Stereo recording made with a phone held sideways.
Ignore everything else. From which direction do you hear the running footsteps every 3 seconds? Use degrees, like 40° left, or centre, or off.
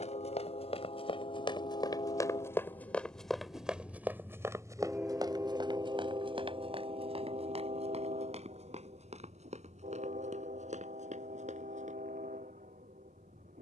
40° left, 20° right, 50° right, 60° right, off.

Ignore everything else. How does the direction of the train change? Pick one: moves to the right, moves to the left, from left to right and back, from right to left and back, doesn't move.
moves to the right.